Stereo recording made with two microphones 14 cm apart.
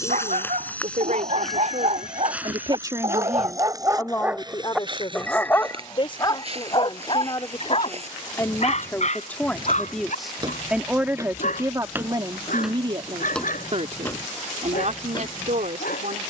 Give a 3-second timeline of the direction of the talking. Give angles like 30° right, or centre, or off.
60° right, 20° left, 30° left, centre, 40° right, 60° right.